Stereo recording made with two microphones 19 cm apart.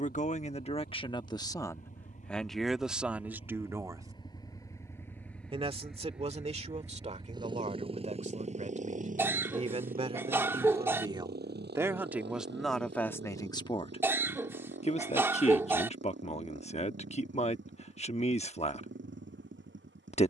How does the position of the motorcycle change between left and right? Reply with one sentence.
In this clip you hear the motorcycle move from left to right.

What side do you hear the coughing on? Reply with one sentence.
You can hear the coughing in the centre.